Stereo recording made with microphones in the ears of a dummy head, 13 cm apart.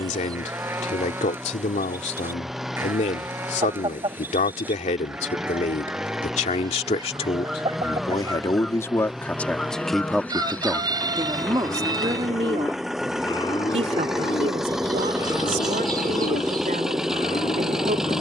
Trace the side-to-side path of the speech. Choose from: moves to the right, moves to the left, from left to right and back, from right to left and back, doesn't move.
moves to the right.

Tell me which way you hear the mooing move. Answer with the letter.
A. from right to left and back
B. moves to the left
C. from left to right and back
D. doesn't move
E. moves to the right
B.